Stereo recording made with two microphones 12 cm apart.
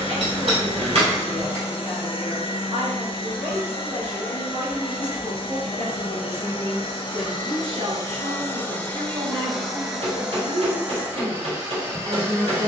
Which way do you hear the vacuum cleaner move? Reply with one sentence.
You can hear the vacuum cleaner go from the left side to the right.